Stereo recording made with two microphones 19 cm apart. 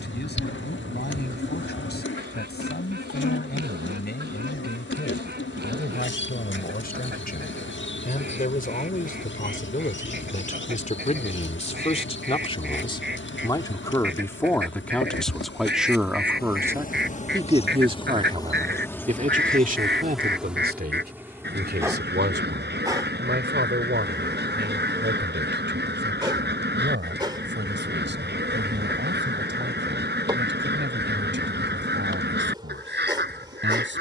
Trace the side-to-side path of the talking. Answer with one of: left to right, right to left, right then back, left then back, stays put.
left to right.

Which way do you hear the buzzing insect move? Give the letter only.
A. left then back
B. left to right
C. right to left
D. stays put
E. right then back
B.